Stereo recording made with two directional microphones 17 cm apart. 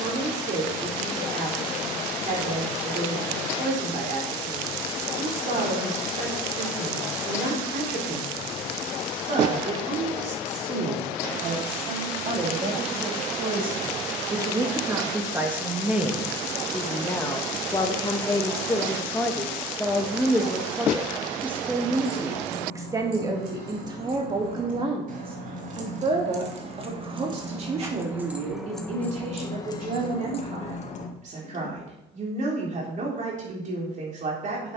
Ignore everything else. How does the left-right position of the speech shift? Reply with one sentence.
You can hear the speech move from right to left and back again.